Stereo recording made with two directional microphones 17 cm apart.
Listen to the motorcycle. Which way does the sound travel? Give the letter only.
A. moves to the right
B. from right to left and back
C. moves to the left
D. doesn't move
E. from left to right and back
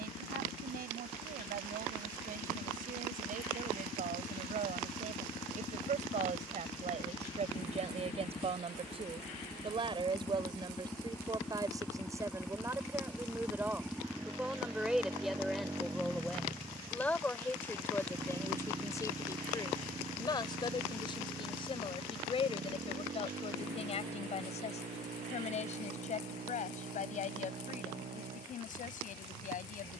A.